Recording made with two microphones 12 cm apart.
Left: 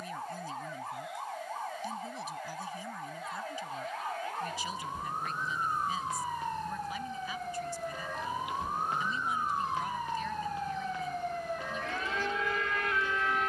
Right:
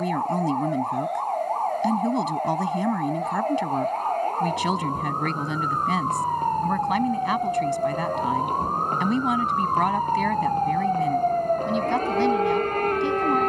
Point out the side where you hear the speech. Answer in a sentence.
You can hear the speech on the right.